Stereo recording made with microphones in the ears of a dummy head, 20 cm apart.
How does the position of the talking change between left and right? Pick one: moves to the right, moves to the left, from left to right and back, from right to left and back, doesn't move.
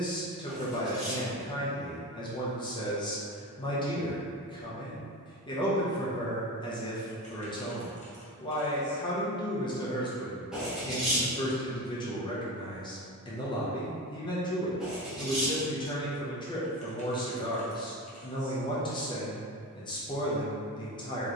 doesn't move.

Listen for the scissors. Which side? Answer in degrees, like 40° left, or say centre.
centre.